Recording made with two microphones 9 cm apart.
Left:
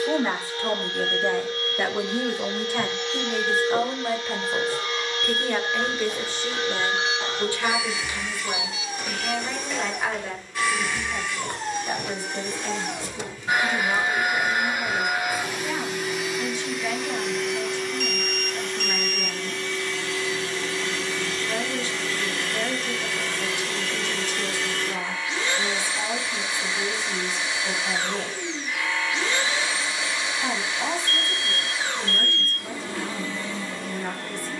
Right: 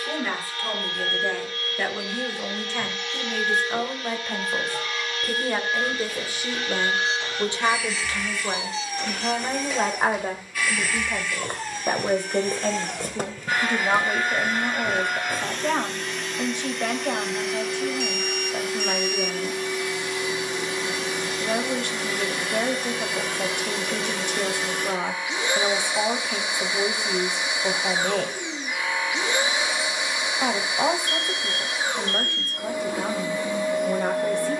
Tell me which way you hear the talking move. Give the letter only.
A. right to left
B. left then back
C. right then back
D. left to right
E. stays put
D.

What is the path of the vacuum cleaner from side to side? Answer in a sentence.
In this clip you hear the vacuum cleaner travel towards the right.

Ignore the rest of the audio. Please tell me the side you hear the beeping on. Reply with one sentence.
You can hear the beeping on the right.